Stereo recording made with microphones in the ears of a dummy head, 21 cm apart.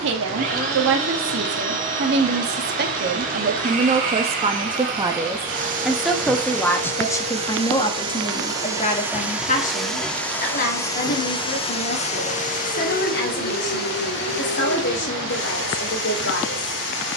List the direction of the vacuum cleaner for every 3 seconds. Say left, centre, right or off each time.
right, right, right, centre, left, left.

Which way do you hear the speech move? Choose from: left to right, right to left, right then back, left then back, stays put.
right to left.